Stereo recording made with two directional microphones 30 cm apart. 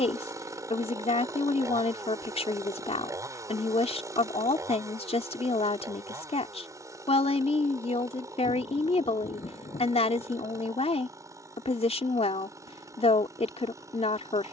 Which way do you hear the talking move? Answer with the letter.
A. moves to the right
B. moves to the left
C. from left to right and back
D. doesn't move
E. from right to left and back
D.